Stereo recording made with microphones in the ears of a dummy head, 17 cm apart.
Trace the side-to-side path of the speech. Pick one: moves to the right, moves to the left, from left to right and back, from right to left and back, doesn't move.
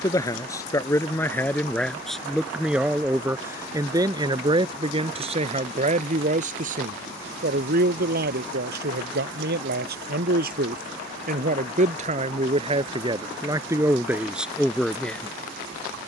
from left to right and back.